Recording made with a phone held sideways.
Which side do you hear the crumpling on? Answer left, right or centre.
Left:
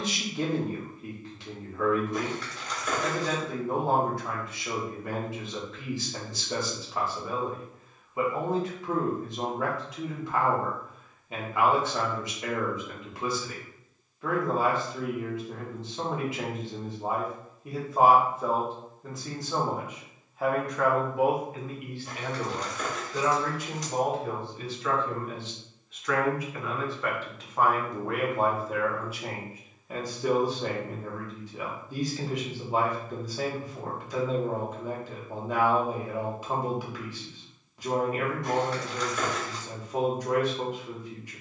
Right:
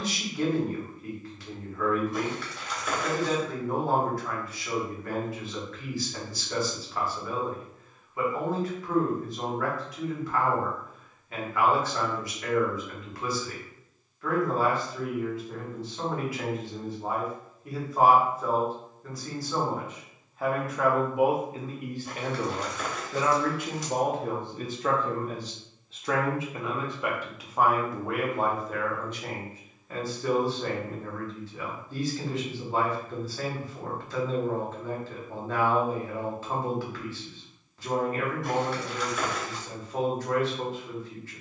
centre.